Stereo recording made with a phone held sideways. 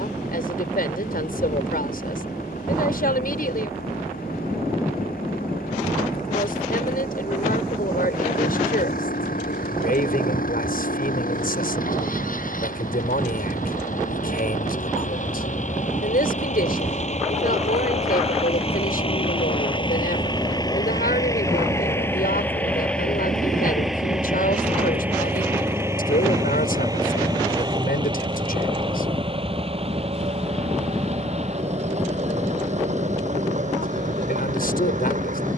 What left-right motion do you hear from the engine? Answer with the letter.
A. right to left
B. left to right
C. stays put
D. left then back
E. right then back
B.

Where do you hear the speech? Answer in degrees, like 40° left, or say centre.
70° left.